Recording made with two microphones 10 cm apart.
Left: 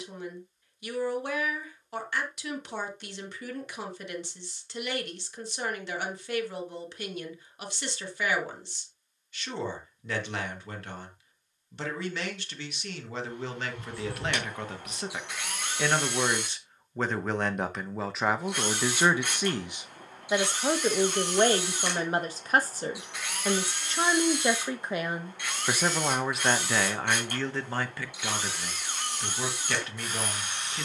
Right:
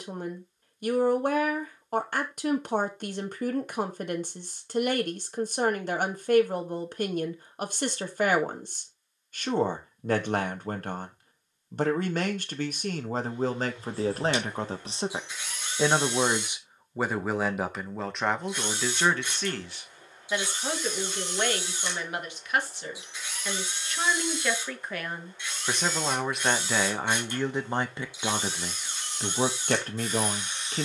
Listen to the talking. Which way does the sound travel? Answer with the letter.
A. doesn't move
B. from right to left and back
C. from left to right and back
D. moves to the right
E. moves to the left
B.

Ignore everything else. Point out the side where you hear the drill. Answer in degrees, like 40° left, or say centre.
70° left.